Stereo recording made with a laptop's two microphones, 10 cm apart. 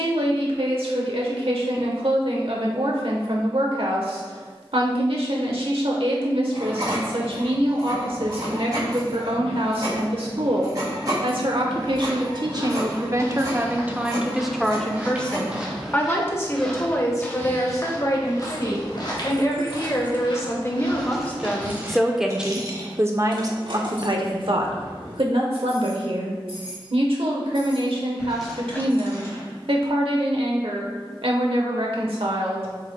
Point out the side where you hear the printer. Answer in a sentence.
In this clip you hear the printer on the right.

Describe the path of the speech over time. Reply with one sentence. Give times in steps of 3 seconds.
In this clip you hear the speech on the right from 0 s, on the left from 15 s, in the centre from 21 s and on the right from 24 s.